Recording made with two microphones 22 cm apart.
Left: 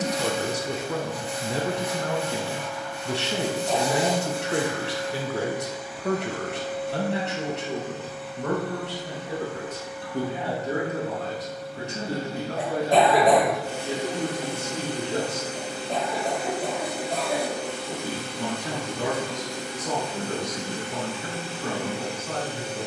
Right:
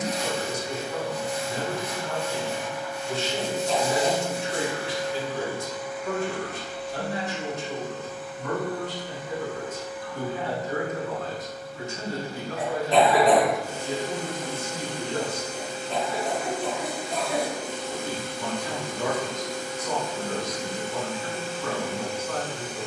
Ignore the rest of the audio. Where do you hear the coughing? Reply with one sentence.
In this clip you hear the coughing on the left.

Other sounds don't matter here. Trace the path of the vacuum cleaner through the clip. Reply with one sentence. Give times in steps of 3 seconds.
You can hear the vacuum cleaner on the left from 0 s, in the centre from 3 s and on the left from 6 s.